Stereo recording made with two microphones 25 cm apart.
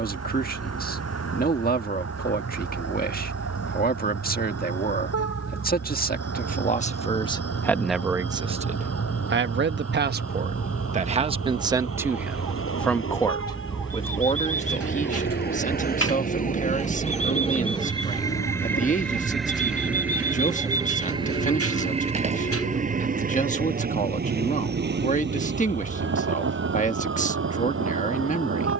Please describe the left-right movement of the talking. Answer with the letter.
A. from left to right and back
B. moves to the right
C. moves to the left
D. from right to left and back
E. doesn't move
A.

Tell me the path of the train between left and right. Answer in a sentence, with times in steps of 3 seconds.
In this clip you hear the train on the left from 0 s, in the centre from 18 s and on the right from 21 s.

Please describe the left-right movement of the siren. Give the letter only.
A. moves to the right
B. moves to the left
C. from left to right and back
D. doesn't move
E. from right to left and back
A.